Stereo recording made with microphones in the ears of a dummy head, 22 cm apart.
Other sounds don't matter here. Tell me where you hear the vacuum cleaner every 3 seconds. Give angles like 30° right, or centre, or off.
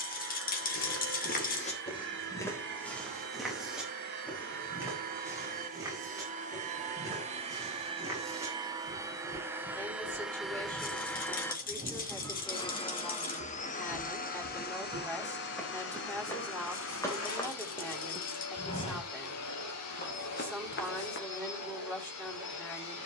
50° right, 40° right, 20° right, centre, 30° left, 50° left, 70° left, 70° left.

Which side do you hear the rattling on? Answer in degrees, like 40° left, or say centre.
40° left.